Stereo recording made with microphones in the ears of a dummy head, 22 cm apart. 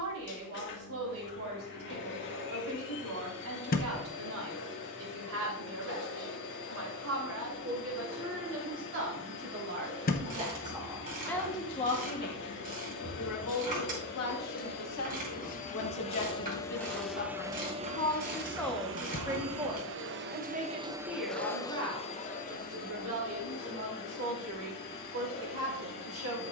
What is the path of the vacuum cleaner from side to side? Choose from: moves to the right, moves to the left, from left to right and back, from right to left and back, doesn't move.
from left to right and back.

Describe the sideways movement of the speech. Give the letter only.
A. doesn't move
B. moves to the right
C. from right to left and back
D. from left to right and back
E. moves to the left
C.